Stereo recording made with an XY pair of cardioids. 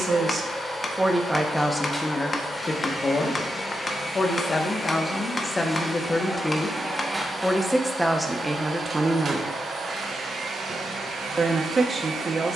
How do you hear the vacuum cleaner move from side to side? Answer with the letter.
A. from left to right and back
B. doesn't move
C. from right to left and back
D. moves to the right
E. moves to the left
D.